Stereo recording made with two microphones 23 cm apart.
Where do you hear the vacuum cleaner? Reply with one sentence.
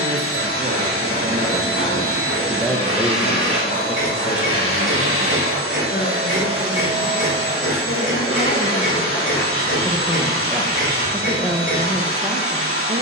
You can hear the vacuum cleaner on the right.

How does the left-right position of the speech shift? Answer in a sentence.
You can hear the speech move from right to left and back again.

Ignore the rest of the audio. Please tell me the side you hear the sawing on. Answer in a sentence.
In this clip you hear the sawing on the left.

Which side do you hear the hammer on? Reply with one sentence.
In this clip you hear the hammer on the left.